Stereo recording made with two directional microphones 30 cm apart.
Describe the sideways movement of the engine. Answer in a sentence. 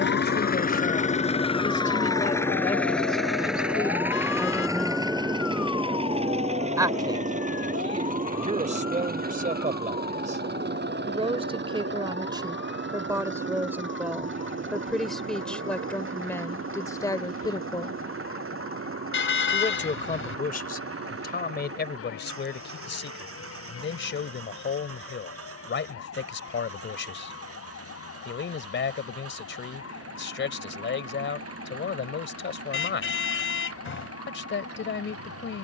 You can hear the engine go from the left side to the right.